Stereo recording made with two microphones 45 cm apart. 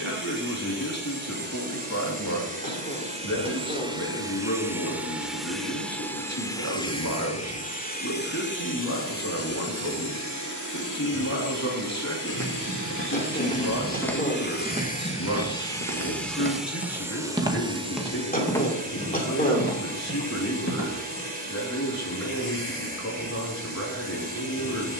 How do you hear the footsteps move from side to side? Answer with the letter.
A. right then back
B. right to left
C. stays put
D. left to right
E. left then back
A.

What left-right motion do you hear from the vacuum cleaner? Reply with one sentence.
You can hear the vacuum cleaner move from right to left and back again.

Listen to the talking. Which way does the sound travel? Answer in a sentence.
In this clip you hear the talking stay in one place.